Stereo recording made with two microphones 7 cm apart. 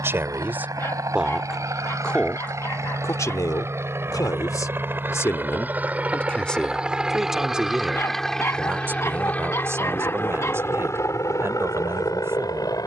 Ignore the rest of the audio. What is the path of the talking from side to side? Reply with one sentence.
You can hear the talking go left and come back.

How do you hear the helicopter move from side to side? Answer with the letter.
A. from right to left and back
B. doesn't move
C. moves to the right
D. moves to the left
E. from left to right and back
D.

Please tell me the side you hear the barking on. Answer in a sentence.
You can hear the barking on the left.